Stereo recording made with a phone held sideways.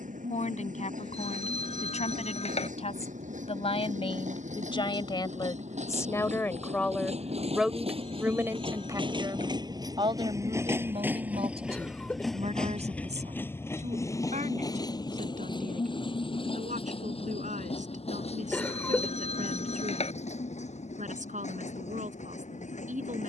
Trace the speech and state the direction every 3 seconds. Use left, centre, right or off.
left, left, centre, right, right, right, right, right.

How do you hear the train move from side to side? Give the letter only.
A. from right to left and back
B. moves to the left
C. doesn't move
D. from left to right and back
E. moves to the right
B.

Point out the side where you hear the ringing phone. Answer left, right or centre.
left.